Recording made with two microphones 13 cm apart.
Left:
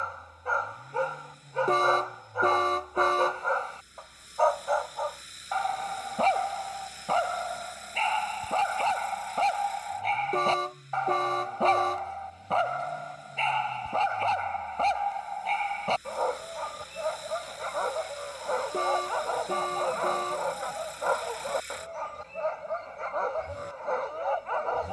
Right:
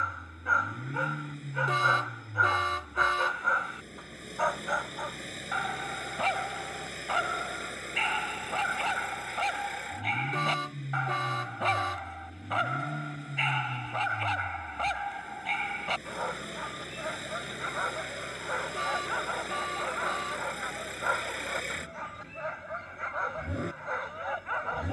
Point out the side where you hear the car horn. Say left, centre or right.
left.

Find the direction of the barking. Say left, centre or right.
left.